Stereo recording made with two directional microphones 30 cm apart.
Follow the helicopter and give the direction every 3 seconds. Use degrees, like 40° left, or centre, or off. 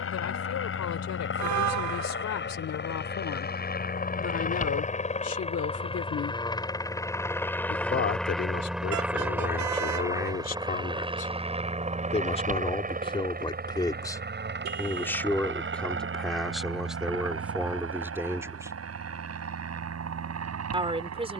40° left, 30° left, 10° left, 10° right, 30° right, 40° right, 50° right.